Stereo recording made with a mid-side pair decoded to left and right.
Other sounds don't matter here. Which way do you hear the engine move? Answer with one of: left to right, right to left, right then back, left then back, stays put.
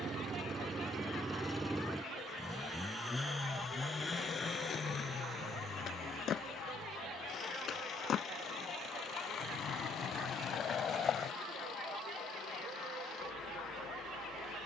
right to left.